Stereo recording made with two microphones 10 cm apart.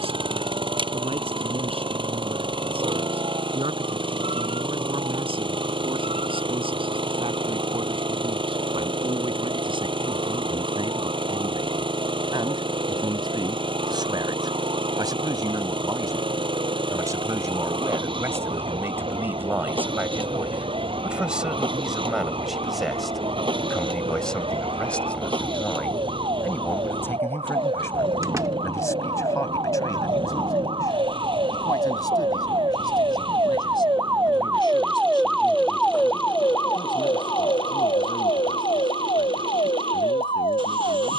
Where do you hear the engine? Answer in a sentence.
In this clip you hear the engine on the right.